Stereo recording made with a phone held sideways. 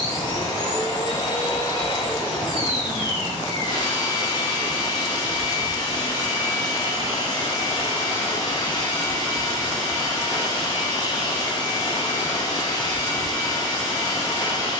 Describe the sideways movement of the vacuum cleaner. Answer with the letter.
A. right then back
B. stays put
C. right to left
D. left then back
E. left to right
B.